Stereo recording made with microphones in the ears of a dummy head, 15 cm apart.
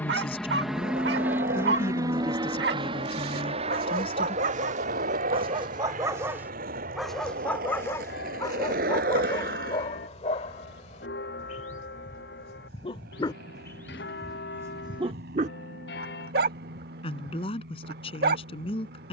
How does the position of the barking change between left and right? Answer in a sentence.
In this clip you hear the barking move from right to left and back again.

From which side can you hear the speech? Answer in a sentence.
You can hear the speech on the left.